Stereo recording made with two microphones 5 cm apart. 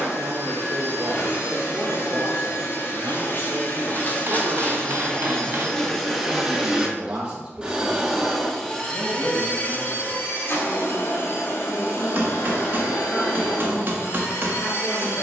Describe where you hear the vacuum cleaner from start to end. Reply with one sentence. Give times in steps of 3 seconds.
In this clip you hear the vacuum cleaner on the left from 0 s, in the centre from 6 s and on the left from 9 s.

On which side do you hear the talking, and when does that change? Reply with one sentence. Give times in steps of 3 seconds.
You can hear the talking on the right from 0 s and in the centre from 9 s.